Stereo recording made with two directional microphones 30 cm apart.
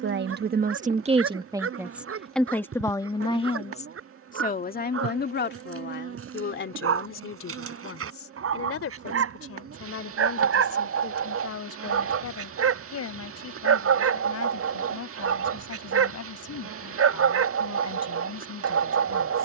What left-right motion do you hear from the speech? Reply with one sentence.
In this clip you hear the speech go from the right side to the left.